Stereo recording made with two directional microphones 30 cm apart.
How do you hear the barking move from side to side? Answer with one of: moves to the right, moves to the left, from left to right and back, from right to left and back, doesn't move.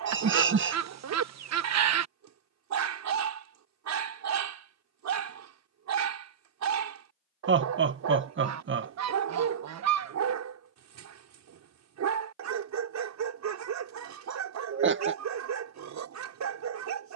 doesn't move.